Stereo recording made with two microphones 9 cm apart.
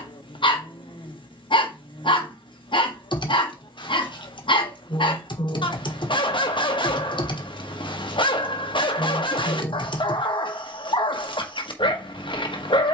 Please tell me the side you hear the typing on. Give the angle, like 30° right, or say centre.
60° left.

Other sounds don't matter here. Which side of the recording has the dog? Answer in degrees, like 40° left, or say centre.
60° left.